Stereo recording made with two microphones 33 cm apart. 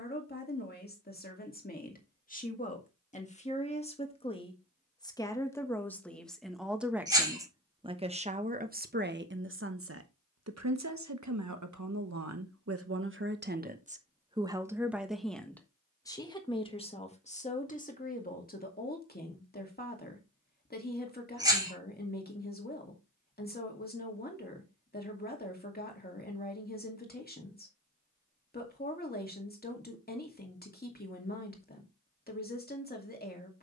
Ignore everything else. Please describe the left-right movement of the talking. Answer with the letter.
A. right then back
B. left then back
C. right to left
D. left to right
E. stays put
A.